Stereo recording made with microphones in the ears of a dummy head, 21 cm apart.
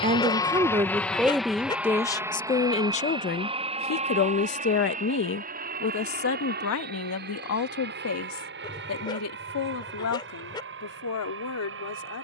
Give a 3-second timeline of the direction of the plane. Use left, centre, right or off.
centre, right, right, right.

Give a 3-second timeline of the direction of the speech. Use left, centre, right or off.
centre, left, left, left.